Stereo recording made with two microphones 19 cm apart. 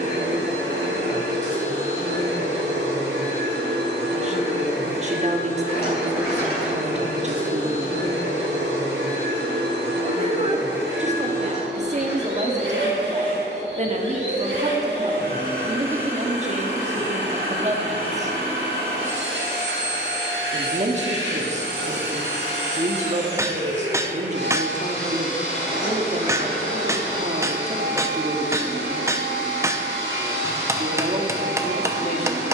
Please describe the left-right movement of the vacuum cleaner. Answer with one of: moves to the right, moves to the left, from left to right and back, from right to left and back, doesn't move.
doesn't move.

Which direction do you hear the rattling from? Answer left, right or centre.
left.